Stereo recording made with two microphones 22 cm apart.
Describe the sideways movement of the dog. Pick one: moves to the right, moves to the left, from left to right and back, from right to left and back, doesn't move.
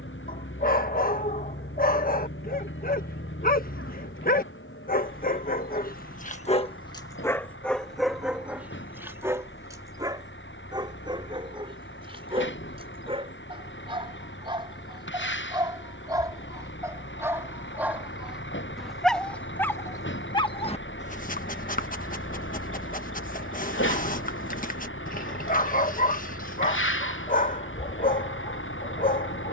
from left to right and back.